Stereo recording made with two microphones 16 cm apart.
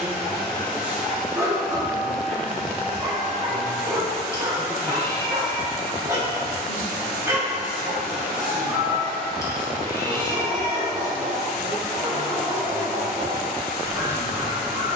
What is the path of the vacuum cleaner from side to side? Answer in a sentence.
You can hear the vacuum cleaner stay in one place.